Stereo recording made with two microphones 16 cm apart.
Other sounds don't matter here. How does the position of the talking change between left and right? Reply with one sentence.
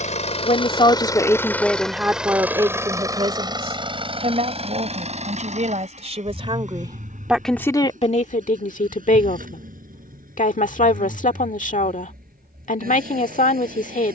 You can hear the talking go right and come back.